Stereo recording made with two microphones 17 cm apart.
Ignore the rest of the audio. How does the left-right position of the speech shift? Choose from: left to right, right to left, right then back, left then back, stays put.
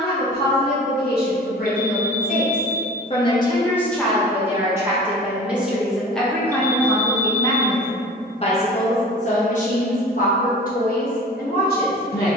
right then back.